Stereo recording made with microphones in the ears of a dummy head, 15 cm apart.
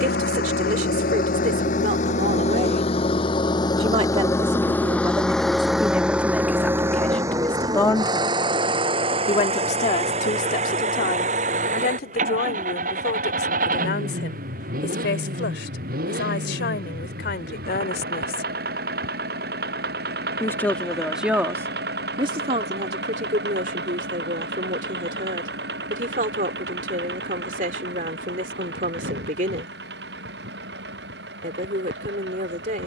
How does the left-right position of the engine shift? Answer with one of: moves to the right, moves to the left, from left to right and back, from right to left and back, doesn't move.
moves to the right.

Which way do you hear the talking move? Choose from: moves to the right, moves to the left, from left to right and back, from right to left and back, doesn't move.
from right to left and back.